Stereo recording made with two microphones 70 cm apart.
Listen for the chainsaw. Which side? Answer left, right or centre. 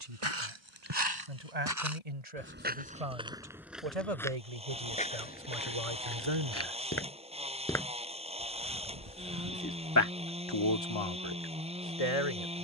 centre.